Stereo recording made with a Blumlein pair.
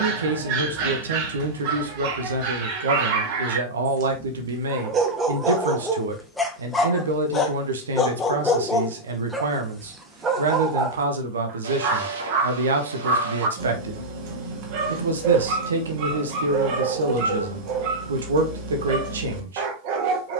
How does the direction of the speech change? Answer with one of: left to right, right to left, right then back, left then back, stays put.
stays put.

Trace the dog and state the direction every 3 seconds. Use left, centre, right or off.
right, right, centre, right, right, right, right.